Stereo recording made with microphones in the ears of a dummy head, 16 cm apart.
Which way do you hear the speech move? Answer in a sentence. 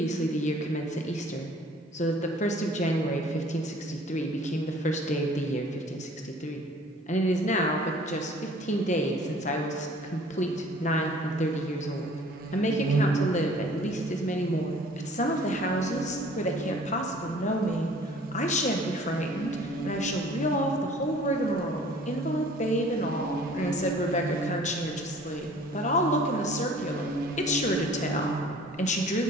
In this clip you hear the speech stay put.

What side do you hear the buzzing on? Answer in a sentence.
In this clip you hear the buzzing on the right.